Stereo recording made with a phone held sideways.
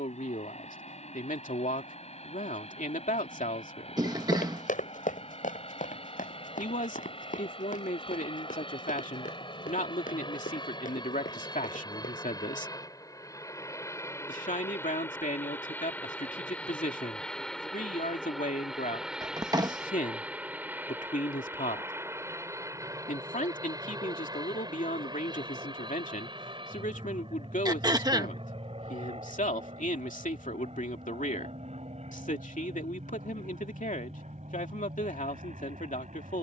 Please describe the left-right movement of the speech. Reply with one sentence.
You can hear the speech stay in one place.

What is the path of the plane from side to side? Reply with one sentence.
You can hear the plane travel towards the right.